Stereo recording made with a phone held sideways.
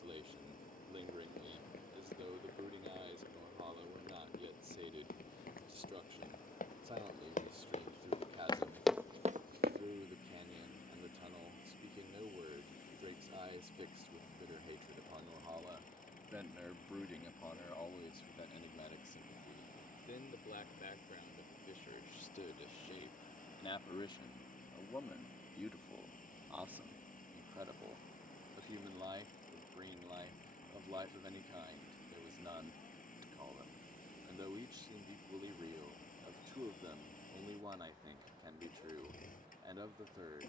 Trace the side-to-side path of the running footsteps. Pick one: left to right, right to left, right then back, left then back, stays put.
left to right.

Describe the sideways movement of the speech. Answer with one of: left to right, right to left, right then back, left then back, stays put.
left then back.